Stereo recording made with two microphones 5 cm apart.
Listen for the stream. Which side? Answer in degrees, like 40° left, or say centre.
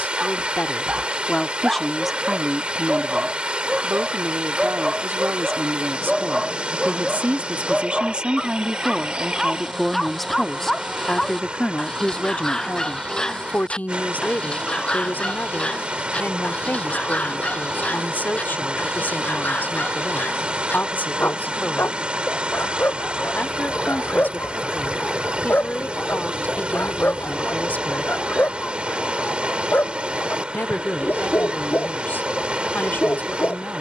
20° right.